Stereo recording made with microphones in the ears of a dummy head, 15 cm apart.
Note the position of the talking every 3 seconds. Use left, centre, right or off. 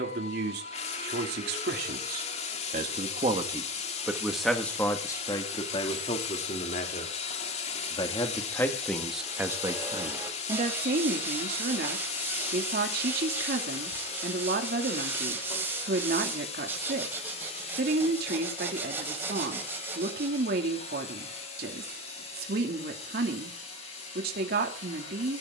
right, centre, left, right, right, right, right, right, right.